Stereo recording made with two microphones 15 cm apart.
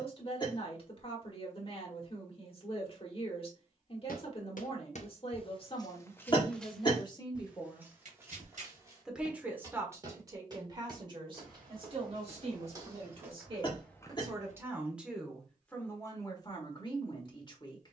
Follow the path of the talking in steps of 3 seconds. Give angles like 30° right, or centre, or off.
40° left, 40° left, 30° left, 30° right, 30° right, 20° left.